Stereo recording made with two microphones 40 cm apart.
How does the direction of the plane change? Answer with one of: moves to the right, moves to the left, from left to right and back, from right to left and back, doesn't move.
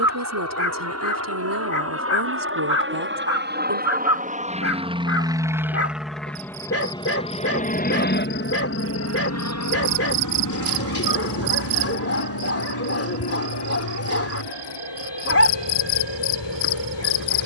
moves to the left.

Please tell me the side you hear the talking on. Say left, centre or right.
right.